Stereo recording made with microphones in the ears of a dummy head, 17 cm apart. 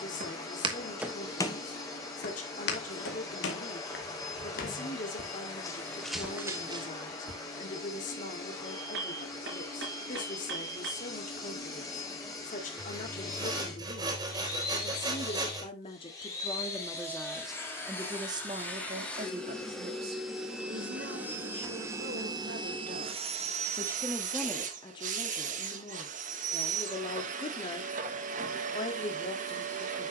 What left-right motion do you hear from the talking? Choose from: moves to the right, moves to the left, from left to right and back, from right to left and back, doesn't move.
from left to right and back.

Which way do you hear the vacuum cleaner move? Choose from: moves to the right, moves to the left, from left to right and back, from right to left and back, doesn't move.
moves to the right.